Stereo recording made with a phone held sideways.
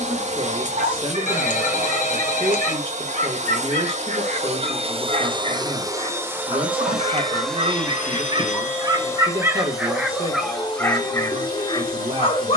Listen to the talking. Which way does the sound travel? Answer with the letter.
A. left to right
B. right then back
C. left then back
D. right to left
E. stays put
E.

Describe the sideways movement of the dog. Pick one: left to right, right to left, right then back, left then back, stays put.
right to left.